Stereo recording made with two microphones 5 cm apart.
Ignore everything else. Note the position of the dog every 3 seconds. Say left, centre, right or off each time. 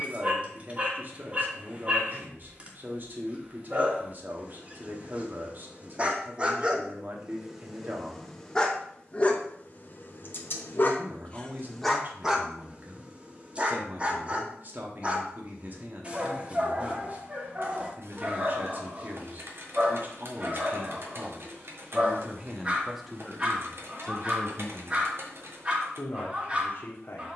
right, right, centre, left, right, right, right, right, right.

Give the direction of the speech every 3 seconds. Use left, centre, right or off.
right, right, right, right, right, right, right, centre, left.